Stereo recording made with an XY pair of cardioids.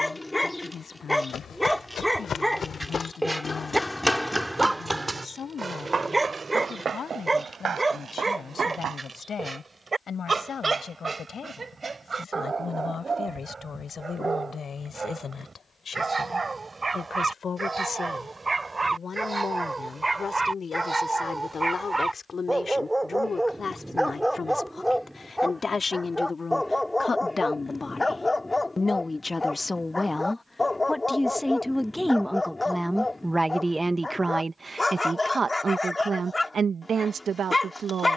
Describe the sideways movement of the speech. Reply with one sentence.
In this clip you hear the speech go from the left side to the right.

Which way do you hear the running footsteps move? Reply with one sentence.
In this clip you hear the running footsteps move from left to right.